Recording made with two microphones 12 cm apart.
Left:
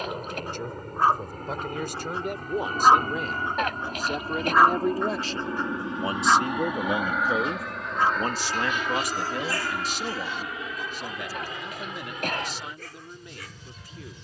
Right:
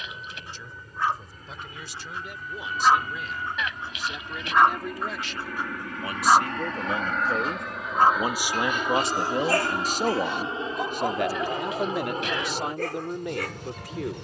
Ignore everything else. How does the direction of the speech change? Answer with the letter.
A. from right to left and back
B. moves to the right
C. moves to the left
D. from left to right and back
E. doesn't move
B.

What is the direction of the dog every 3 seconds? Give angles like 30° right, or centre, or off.
40° left, 10° left, 40° right, 60° right, 70° right.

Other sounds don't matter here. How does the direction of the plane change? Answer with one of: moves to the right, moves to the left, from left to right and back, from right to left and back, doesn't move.
moves to the right.